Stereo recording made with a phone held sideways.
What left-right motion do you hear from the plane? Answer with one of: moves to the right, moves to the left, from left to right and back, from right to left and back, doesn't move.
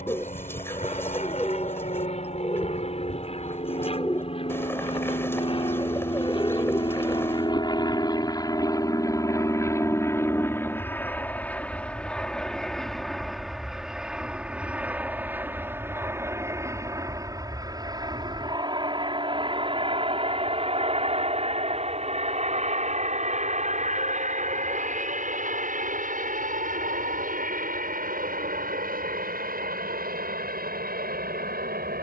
moves to the right.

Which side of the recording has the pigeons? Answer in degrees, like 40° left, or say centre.
10° left.